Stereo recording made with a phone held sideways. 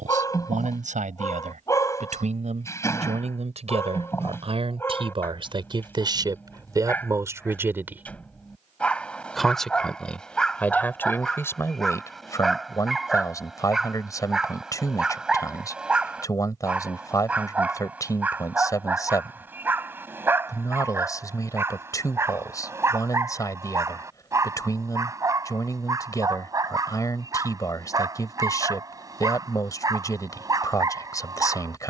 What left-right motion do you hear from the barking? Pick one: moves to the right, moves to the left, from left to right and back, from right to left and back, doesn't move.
moves to the right.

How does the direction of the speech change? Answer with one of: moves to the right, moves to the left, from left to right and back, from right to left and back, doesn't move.
moves to the left.